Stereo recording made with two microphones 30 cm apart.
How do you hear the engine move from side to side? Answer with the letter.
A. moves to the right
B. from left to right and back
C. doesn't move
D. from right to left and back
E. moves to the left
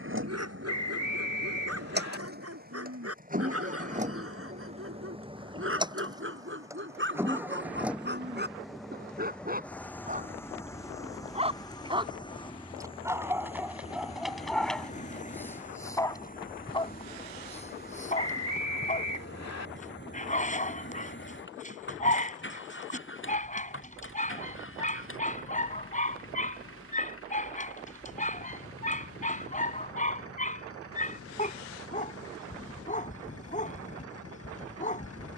E.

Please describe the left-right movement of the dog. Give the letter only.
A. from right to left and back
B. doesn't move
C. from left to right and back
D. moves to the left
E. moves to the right
D.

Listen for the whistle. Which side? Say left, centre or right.
left.